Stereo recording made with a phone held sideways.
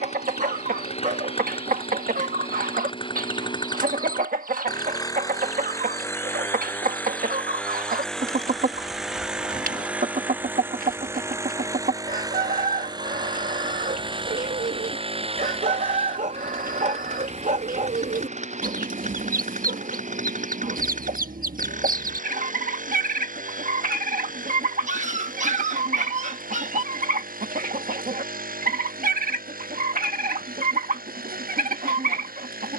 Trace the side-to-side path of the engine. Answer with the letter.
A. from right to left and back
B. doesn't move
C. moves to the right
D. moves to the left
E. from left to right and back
C.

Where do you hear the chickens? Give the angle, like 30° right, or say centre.
70° right.